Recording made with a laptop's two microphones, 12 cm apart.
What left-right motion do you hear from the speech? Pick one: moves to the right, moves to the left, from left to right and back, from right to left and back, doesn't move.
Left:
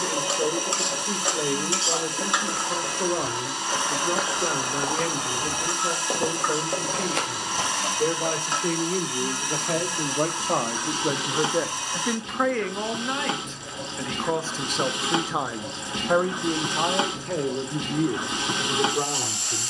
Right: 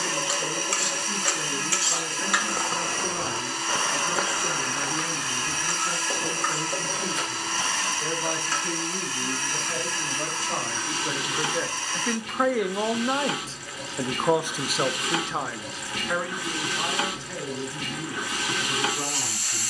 from left to right and back.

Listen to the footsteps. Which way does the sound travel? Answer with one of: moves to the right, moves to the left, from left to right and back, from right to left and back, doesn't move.
moves to the left.